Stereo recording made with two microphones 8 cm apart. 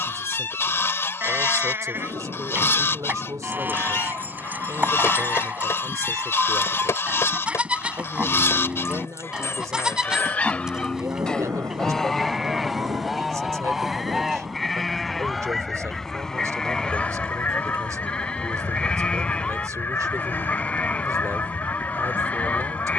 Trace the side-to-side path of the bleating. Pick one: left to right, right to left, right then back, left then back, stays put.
right to left.